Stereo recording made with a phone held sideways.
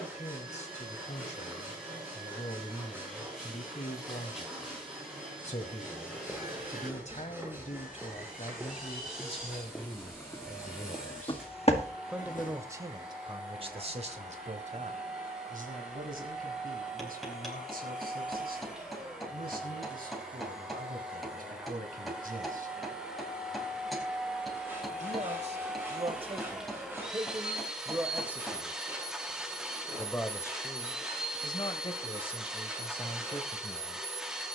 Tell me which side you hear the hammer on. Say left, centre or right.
centre.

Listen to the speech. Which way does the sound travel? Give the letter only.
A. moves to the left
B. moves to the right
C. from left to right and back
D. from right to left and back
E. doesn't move
C.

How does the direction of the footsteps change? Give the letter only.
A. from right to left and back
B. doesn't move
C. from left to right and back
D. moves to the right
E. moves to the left
E.